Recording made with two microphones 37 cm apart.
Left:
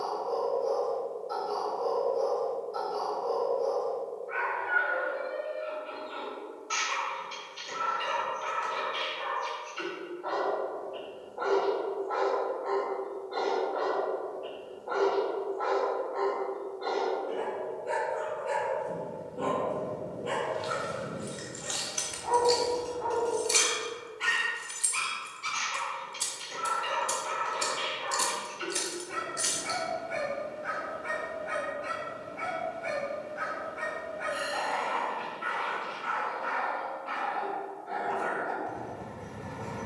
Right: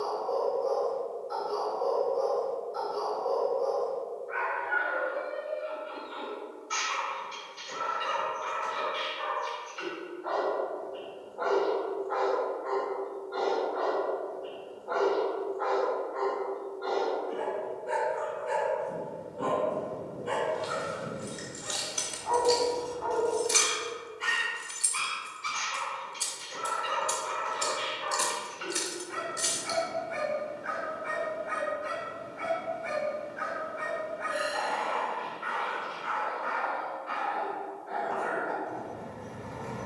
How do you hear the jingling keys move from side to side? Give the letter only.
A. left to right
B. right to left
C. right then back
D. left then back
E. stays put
D.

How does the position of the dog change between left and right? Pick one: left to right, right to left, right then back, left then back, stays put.
stays put.